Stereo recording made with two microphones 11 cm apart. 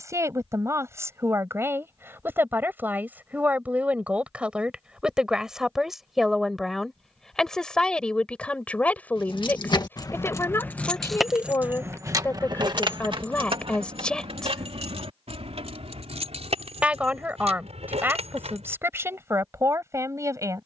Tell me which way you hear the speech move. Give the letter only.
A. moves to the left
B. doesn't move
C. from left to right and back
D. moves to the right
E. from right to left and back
E.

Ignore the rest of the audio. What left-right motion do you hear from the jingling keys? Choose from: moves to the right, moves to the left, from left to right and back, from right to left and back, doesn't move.
moves to the right.